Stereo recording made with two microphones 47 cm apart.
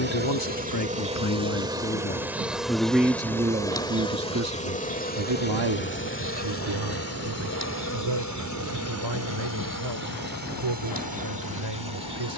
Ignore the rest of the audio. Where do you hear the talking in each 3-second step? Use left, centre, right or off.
left, right, right, right.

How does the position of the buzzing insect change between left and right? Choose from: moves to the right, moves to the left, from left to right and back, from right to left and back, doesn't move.
moves to the left.